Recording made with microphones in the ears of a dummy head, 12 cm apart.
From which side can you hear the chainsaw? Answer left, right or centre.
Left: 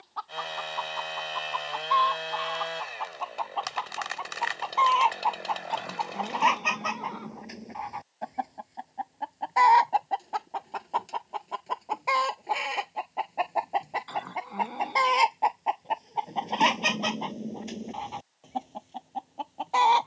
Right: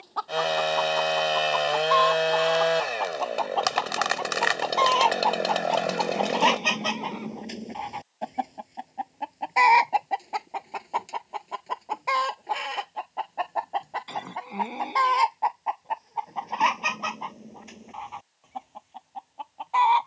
right.